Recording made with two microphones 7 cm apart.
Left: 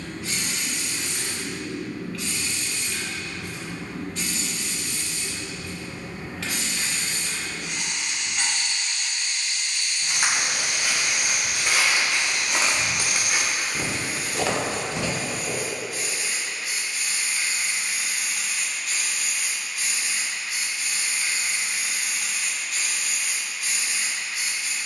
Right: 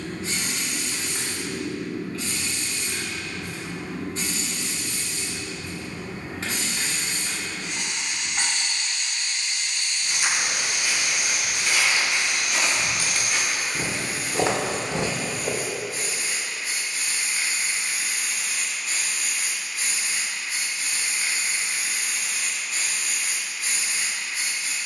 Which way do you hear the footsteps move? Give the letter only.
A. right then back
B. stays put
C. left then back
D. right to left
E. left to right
E.